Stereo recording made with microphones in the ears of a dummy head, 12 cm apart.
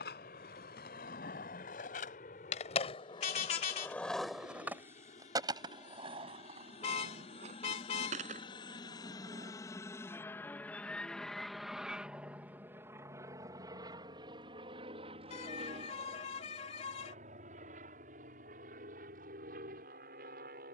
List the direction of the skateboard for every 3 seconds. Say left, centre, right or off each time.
left, centre, right, right, off, off, off.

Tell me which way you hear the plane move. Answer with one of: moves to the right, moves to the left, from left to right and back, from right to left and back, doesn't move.
moves to the right.